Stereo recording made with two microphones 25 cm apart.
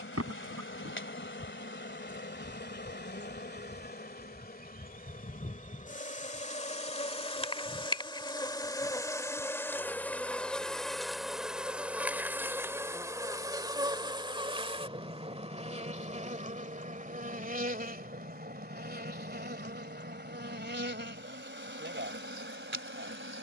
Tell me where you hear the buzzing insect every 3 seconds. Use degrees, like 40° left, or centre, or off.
50° left, 40° left, 20° left, centre, 10° right, 30° right, 40° right, 50° right.